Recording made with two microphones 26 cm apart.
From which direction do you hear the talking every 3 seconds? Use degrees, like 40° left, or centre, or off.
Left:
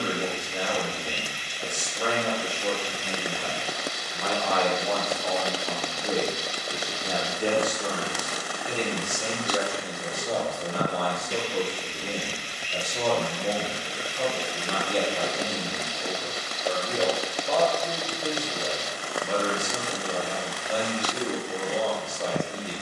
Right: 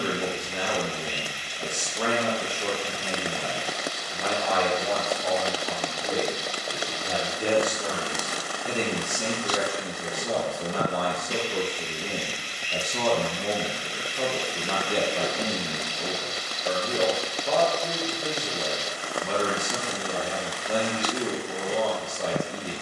60° right, 20° right, 10° right, 60° right, 60° right, 60° right, 60° right, 60° right.